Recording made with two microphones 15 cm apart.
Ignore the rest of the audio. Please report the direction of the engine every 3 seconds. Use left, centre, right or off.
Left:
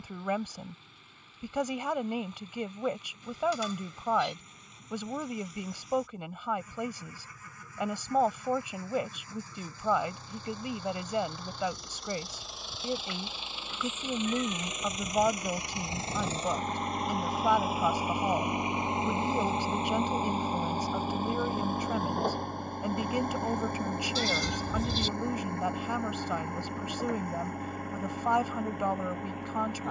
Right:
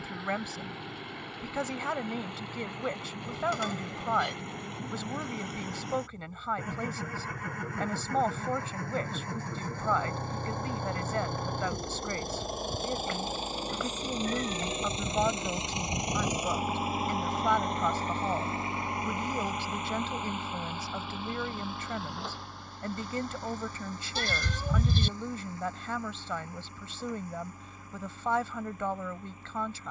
right, right, right, right, right, centre, left, left, left, left.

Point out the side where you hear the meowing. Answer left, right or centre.
right.